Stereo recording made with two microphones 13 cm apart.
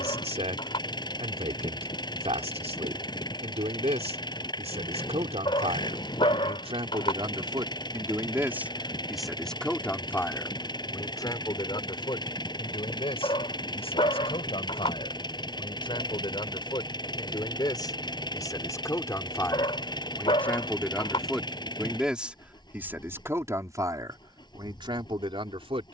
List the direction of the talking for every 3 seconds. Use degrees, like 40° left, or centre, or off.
50° right, 50° right, 30° right, 20° left, 40° left, 40° left, 20° left, 10° right, 40° right.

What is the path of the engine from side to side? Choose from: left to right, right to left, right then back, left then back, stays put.
stays put.